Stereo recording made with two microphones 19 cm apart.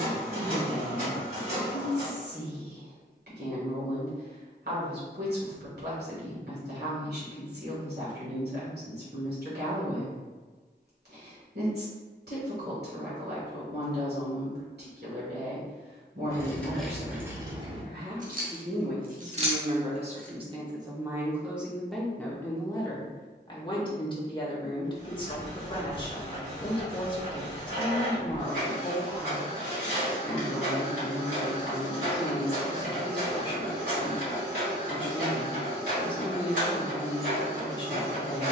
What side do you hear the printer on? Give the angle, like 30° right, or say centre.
60° right.